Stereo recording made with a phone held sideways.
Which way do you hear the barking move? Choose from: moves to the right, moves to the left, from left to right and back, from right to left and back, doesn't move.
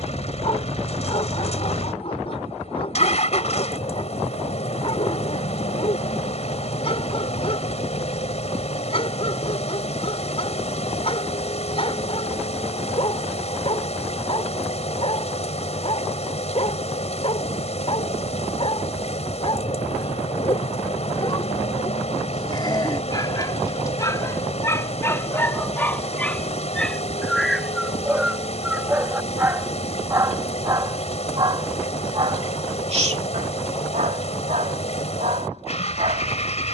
moves to the right.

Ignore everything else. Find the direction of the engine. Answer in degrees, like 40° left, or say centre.
50° left.